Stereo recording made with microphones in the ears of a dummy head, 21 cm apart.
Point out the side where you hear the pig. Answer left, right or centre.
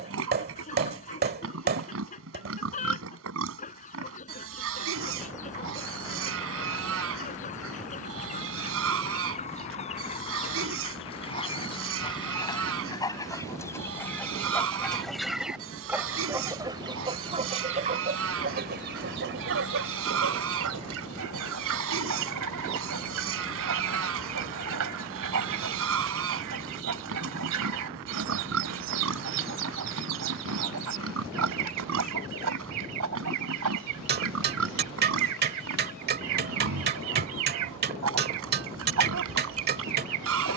right.